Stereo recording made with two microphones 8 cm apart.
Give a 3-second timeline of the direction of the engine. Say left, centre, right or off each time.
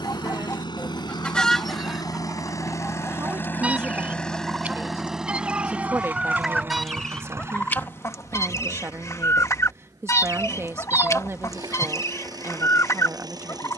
left, centre, right, right, right.